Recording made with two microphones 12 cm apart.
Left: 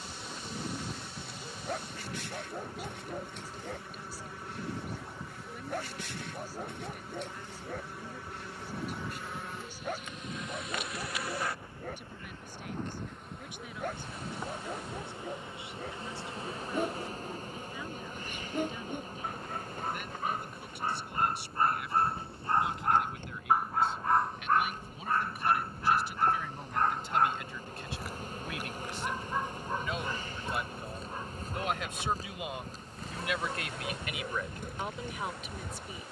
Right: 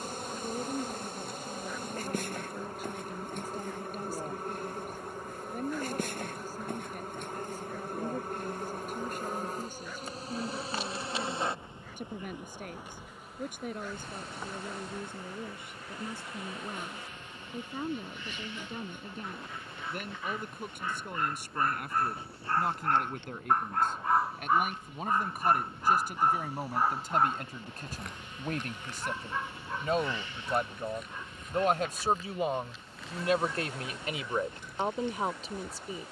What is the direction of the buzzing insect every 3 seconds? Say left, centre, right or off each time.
right, right, right, right, centre, left, left, left, left, left, left, left.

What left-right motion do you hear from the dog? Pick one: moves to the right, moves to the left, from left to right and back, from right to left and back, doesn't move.
from left to right and back.